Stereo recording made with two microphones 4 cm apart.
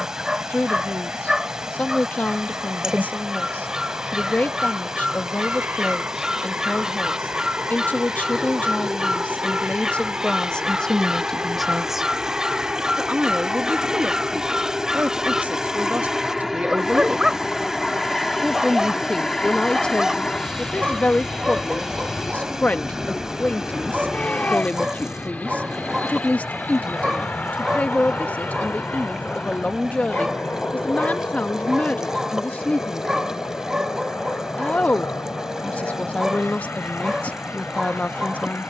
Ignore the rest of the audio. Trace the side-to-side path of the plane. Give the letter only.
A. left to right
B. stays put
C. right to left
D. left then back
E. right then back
C.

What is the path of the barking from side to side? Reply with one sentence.
You can hear the barking stay put.